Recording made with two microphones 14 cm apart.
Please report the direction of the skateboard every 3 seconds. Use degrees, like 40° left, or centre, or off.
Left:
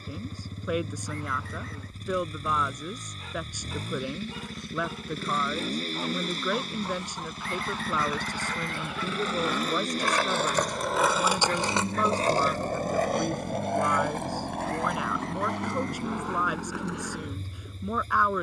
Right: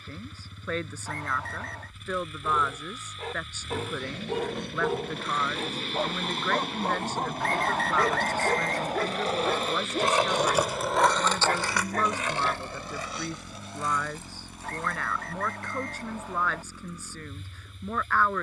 off, 60° right, 50° right, 10° right, 60° left, 80° left.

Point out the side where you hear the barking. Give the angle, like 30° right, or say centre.
70° right.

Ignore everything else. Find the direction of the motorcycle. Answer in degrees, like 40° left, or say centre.
40° left.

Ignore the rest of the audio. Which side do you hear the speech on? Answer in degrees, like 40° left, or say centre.
10° left.